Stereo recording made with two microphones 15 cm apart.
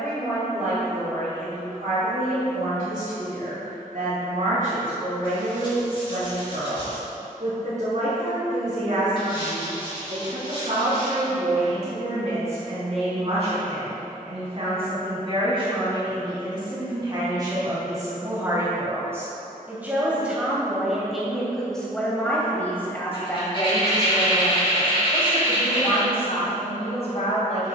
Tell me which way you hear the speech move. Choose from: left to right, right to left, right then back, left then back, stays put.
right to left.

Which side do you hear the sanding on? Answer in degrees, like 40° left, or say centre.
30° left.